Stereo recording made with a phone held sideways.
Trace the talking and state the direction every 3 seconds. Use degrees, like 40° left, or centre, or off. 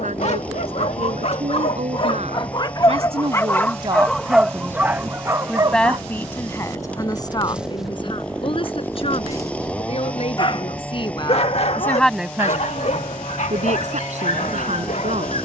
70° right, 30° right, 30° left, 40° left, 50° right.